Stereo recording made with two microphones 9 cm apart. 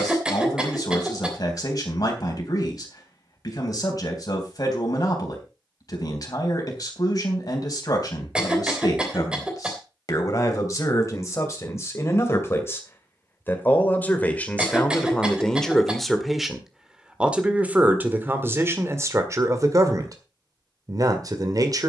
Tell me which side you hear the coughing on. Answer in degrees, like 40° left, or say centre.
10° right.